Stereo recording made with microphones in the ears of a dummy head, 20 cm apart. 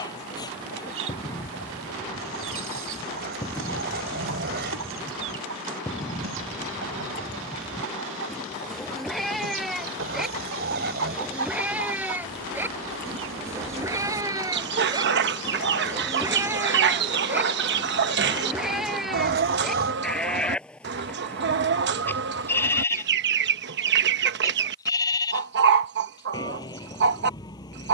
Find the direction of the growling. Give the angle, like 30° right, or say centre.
50° right.